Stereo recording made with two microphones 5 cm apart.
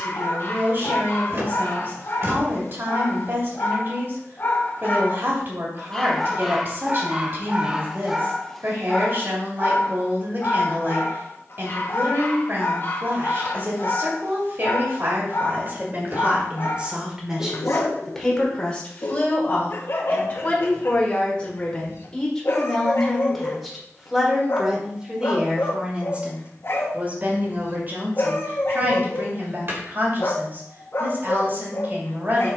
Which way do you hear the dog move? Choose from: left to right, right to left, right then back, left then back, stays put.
right then back.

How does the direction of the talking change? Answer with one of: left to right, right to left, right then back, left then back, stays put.
left then back.